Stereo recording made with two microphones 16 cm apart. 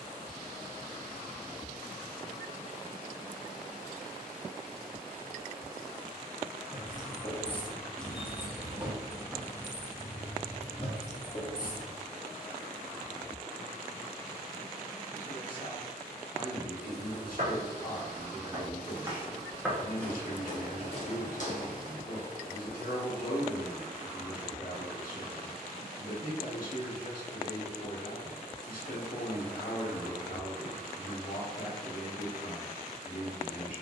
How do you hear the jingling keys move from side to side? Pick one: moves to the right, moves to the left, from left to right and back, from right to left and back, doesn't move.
from left to right and back.